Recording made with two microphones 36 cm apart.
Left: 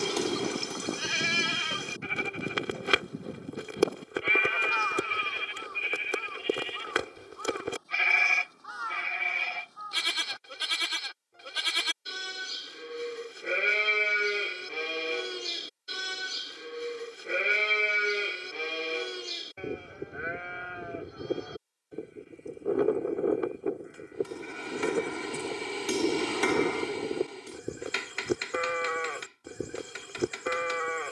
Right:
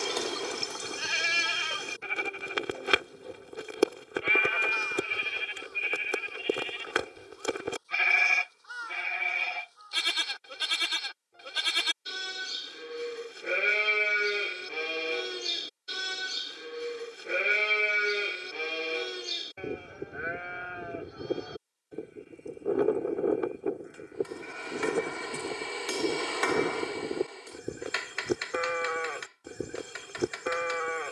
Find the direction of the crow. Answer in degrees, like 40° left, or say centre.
70° left.